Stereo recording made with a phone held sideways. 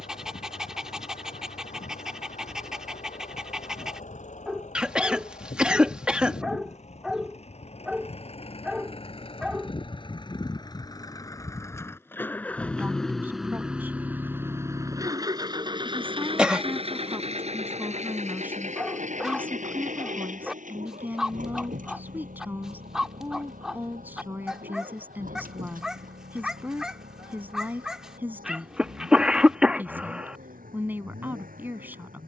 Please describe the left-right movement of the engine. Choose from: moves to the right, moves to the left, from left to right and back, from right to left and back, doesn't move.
moves to the right.